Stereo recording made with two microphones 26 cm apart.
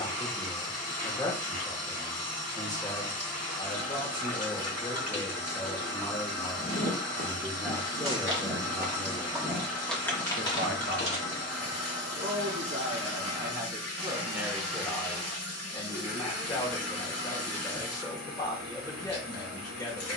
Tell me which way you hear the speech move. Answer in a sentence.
You can hear the speech go right and come back.